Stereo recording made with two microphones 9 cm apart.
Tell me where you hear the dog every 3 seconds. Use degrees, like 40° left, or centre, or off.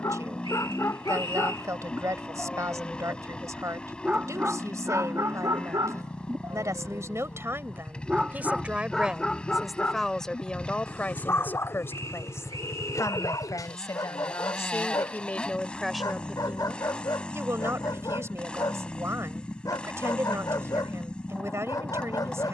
30° left, 30° right, 20° right, 20° left, 40° left, 40° left, 40° left, 40° left.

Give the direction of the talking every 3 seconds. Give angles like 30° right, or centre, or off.
40° right, 40° right, 30° right, 10° left, 40° left, 10° right, 30° right, 30° right.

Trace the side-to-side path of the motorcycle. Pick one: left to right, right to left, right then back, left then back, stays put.
stays put.